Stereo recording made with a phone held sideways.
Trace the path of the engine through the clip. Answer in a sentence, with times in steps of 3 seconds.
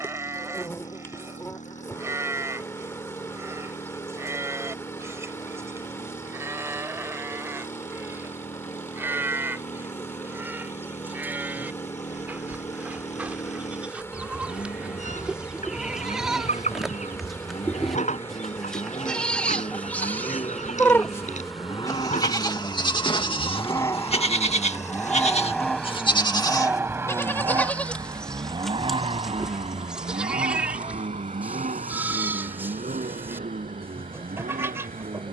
You can hear the engine on the left from 0 s, in the centre from 24 s and on the right from 27 s.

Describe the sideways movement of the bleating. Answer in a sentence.
In this clip you hear the bleating go left and come back.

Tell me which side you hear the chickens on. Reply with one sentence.
In this clip you hear the chickens on the left.